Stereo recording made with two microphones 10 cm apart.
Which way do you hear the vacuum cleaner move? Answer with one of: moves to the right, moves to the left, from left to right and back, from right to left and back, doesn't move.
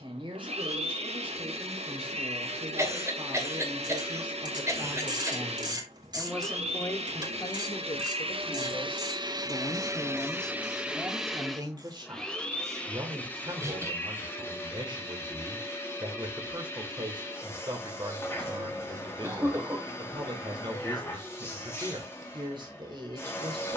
moves to the left.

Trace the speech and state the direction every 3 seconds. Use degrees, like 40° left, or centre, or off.
50° right, 40° right, 40° left, centre, 50° right, 50° right, 50° right, 50° right.